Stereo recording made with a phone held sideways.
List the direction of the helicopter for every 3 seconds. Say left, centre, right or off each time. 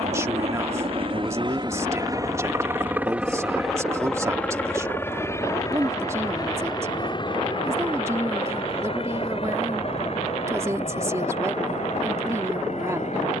right, centre, left, left, left.